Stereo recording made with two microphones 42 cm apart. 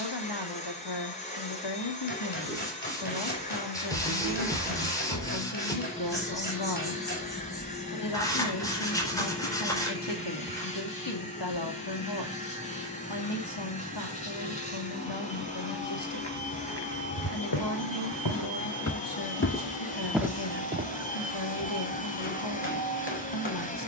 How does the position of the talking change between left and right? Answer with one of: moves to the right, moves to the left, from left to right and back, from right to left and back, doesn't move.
doesn't move.